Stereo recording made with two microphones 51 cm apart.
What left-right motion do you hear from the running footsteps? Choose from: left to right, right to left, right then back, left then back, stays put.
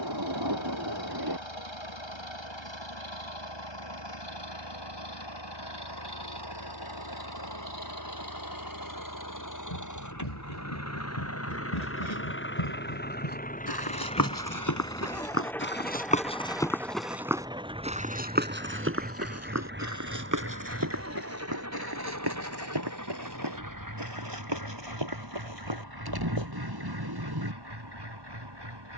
left to right.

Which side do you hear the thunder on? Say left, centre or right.
right.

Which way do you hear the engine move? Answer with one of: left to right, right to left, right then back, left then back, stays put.
left to right.